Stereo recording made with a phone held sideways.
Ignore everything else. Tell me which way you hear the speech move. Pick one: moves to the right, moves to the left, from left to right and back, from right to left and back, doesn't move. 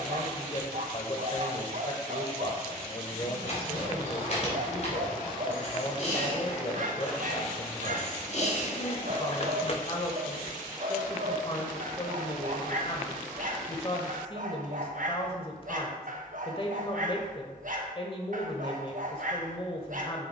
doesn't move.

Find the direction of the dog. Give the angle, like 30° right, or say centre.
60° right.